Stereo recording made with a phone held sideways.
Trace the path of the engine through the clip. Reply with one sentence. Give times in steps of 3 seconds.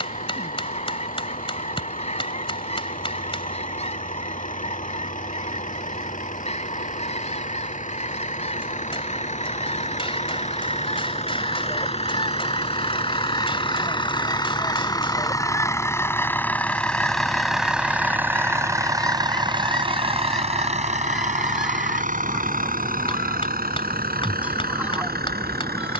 In this clip you hear the engine on the left from 0 s, in the centre from 15 s and on the right from 18 s.